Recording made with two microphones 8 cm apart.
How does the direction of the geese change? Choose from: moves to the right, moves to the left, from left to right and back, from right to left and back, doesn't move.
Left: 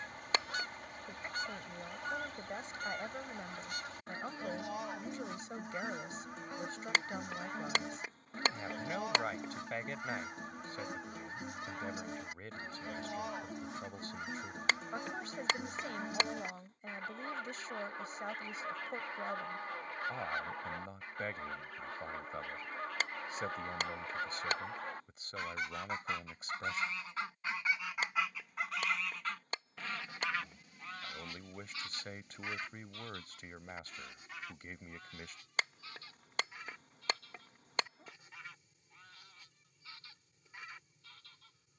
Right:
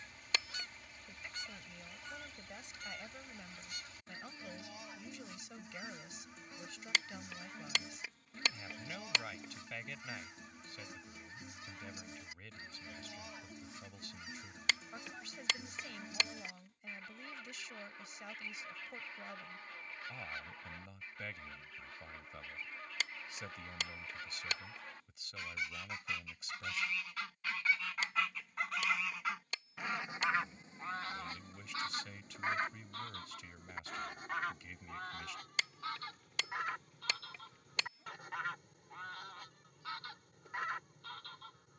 moves to the right.